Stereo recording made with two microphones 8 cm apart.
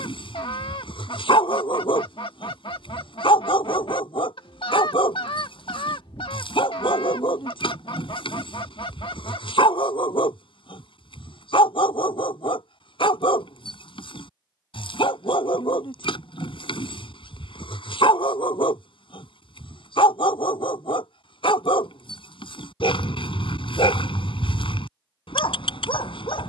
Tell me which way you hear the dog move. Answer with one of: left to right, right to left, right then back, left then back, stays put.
stays put.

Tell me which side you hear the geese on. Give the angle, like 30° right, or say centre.
80° left.